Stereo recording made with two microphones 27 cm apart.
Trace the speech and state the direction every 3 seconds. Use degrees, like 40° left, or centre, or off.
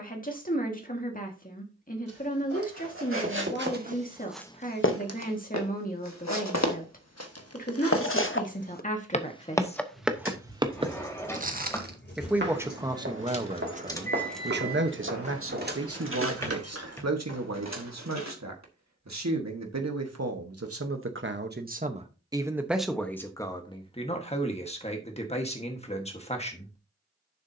30° left, 30° left, 30° left, 20° left, 20° right, 60° right, 70° right, 10° right, 20° left.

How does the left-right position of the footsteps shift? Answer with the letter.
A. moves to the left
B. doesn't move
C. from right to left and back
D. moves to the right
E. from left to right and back
C.